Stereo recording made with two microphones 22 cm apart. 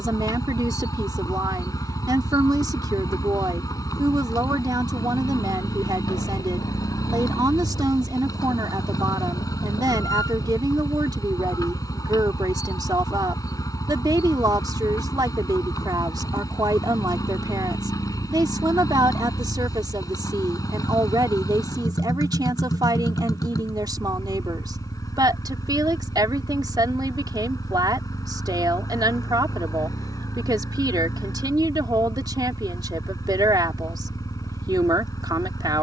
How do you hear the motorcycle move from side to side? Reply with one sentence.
You can hear the motorcycle stay put.